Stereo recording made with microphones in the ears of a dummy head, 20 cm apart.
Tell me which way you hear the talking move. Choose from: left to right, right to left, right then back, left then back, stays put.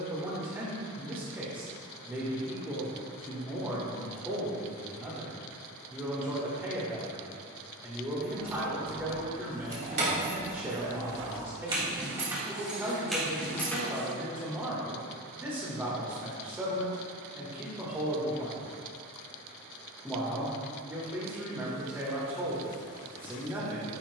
stays put.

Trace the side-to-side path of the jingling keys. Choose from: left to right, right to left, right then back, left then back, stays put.
right to left.